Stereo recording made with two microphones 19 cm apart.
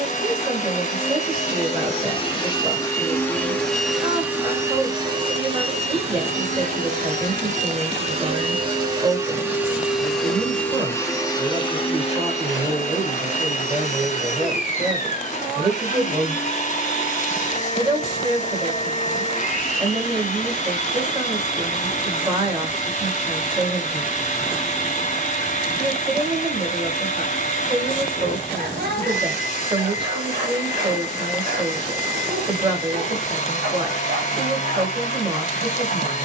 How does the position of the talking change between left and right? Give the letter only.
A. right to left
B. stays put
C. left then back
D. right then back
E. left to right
B.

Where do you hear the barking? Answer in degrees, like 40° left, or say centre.
60° right.